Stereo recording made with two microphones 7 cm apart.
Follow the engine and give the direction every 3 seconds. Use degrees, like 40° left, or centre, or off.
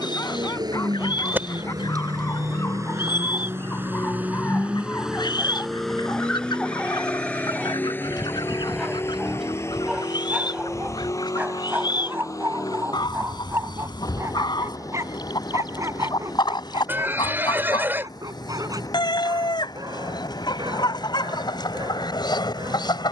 60° right, 20° right, 20° left, 40° left, 50° left, 60° left, 60° left, 60° left.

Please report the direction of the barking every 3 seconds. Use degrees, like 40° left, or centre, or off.
40° left, 30° left, 10° left, 20° right, 40° right, 50° right, 60° right, 70° right.